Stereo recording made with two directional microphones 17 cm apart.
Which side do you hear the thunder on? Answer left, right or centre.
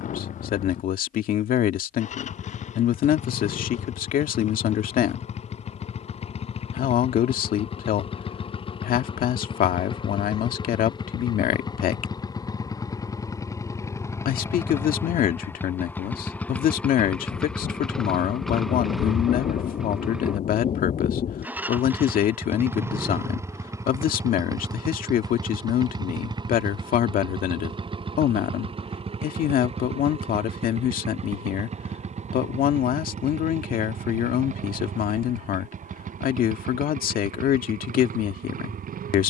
left.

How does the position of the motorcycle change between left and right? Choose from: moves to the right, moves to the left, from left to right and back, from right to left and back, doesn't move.
moves to the right.